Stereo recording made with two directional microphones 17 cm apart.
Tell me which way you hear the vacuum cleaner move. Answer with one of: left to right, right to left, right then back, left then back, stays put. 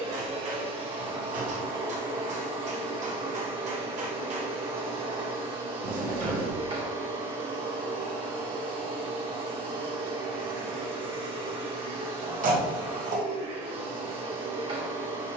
stays put.